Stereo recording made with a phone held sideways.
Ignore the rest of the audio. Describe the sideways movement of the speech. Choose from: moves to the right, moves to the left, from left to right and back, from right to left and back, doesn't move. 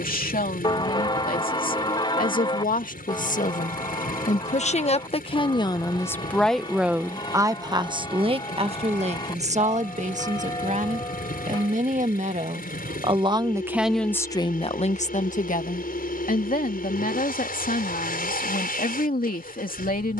from left to right and back.